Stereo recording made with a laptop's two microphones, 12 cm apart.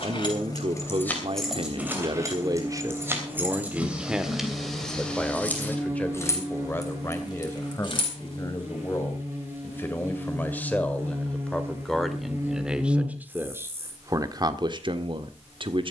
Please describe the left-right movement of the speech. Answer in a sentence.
You can hear the speech go left and come back.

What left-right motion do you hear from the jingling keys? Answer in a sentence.
You can hear the jingling keys move from left to right and back again.